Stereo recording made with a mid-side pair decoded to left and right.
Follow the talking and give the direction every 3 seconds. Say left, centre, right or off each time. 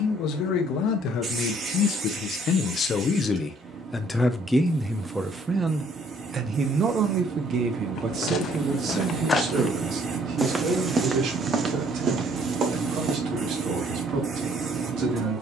left, centre, right, right, right.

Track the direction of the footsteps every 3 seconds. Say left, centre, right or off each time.
off, off, left, centre, right.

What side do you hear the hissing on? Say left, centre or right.
right.